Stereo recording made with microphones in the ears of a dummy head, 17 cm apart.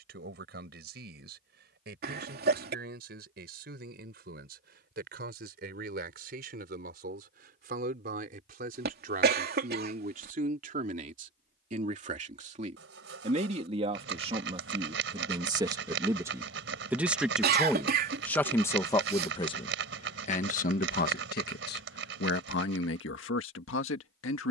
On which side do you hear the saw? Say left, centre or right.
right.